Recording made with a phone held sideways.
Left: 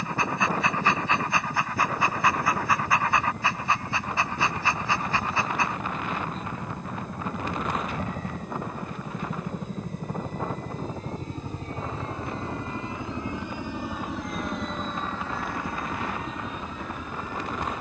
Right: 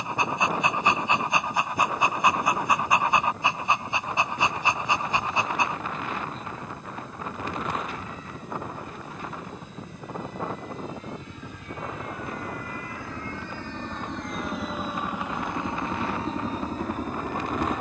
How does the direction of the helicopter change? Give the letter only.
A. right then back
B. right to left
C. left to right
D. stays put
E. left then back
C.